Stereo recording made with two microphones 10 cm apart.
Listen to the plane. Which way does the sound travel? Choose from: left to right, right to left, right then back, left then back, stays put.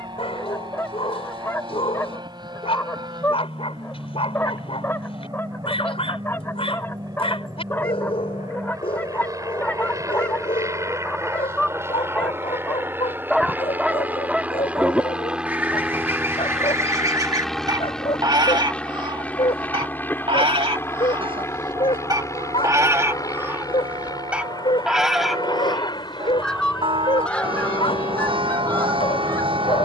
right to left.